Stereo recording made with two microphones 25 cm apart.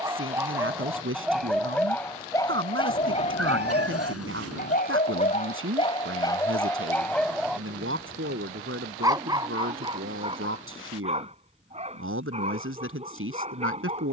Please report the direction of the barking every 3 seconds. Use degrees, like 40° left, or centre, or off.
centre, 30° left, 10° left, 20° right, 30° right.